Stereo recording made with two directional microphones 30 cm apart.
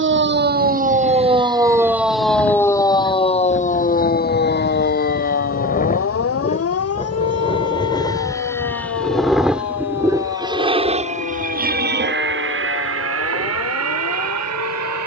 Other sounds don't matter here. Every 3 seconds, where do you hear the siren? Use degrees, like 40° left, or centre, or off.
10° right, 30° left, 50° left, 60° left, 70° left.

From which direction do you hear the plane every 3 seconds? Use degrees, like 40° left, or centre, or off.
50° left, 40° left, 20° left, 10° right, 50° right.